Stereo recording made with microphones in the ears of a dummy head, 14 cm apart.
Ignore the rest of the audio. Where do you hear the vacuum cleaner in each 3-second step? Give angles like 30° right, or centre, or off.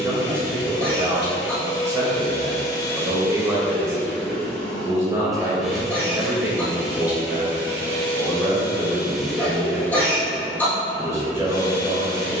30° left, 10° left, 10° right, 20° left.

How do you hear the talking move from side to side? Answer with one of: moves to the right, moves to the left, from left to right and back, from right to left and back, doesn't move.
doesn't move.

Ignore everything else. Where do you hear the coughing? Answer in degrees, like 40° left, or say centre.
10° left.